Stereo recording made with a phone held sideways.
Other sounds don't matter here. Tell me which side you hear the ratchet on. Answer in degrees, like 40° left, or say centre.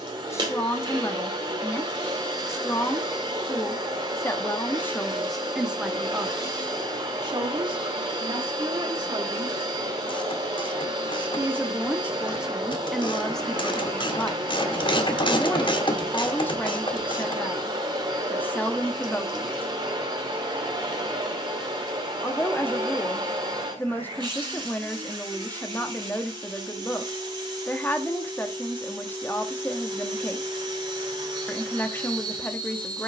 40° left.